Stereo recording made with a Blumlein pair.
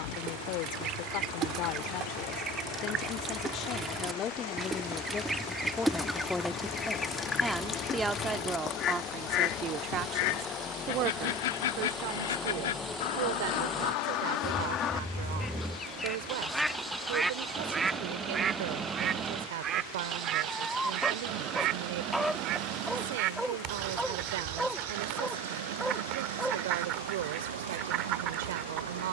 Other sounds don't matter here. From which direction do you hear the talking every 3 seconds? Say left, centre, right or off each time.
left, left, centre, right, right, right, right, right, right, right.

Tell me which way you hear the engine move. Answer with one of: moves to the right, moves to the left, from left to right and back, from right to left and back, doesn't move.
moves to the right.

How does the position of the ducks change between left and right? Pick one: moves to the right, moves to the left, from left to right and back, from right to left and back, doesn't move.
from right to left and back.